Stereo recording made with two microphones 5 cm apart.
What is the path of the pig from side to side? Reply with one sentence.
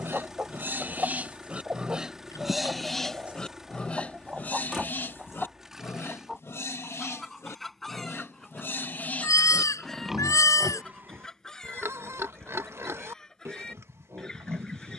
In this clip you hear the pig go left and come back.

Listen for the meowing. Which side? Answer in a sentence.
In this clip you hear the meowing on the left.